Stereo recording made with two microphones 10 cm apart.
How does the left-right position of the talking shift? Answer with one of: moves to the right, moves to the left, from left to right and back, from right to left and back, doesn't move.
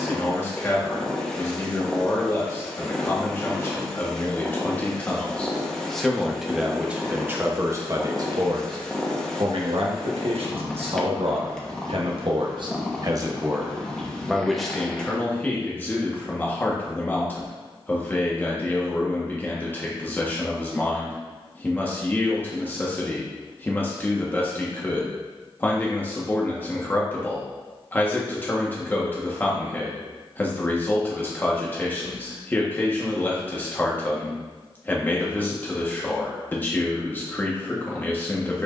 from left to right and back.